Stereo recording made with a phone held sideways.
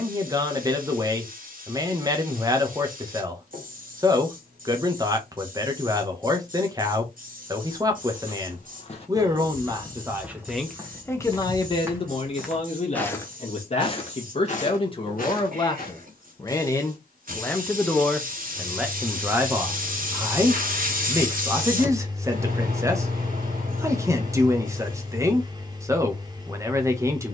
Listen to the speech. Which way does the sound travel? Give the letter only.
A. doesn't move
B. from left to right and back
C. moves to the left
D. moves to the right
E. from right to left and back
E.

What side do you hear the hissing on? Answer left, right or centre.
right.